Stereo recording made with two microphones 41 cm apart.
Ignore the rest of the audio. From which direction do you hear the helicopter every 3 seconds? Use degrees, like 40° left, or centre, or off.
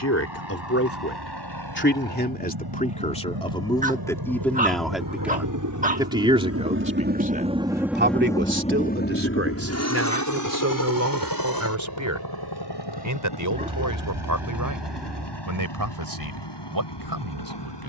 70° right, 60° right, 10° right, 40° left, 60° left, 70° left.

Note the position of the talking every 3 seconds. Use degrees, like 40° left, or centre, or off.
30° left, 10° left, 20° right, 40° right, 50° right, 60° right.